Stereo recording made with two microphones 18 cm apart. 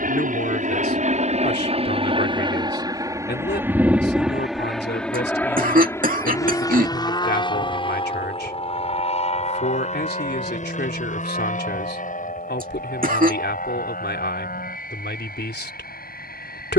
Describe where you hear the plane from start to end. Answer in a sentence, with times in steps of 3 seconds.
In this clip you hear the plane on the right from 0 s, in the centre from 3 s and on the left from 6 s.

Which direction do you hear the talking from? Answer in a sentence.
In this clip you hear the talking on the left.